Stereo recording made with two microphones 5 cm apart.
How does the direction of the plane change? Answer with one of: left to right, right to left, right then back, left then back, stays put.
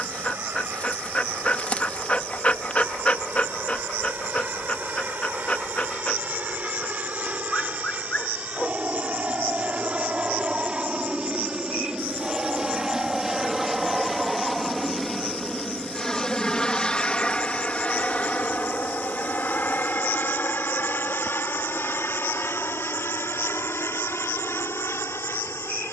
right to left.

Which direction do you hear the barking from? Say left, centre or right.
left.